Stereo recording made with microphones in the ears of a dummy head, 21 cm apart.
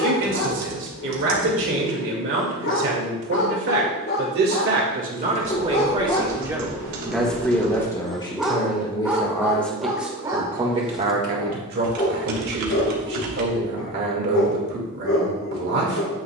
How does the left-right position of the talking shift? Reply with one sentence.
In this clip you hear the talking move from right to left and back again.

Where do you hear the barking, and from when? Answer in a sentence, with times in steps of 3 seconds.
In this clip you hear the barking on the left from 0 s, in the centre from 6 s and on the left from 12 s.